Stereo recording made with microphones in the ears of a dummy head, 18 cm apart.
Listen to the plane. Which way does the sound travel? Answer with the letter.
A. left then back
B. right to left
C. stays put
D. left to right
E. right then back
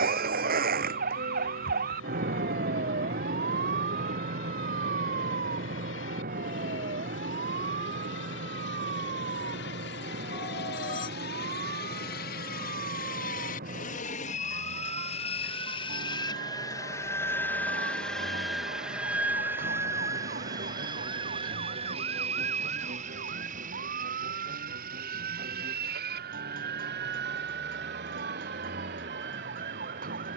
D.